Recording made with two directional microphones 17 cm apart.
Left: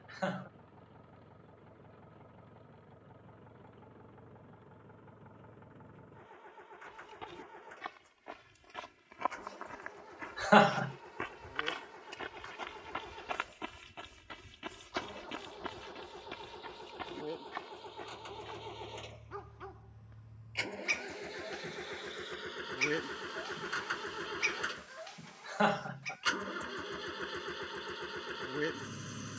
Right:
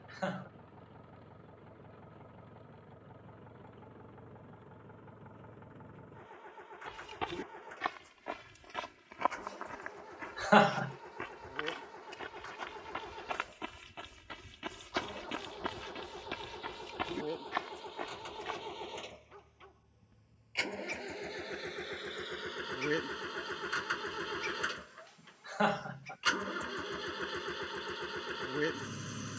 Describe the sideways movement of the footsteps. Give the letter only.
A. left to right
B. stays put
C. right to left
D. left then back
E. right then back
D.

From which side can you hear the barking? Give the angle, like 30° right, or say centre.
50° left.